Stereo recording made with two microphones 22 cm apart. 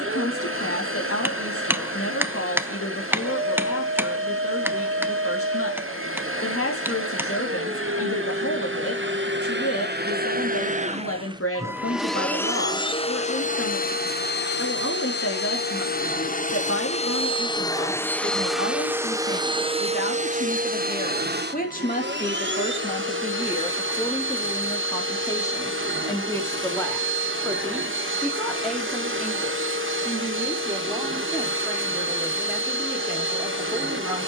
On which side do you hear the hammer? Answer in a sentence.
In this clip you hear the hammer in the centre.